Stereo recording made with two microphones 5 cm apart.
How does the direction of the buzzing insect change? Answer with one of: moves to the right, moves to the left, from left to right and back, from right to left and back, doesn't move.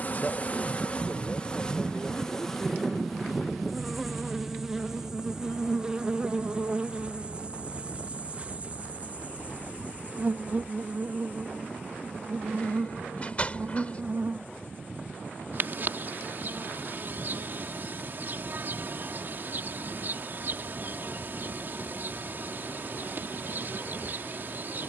moves to the right.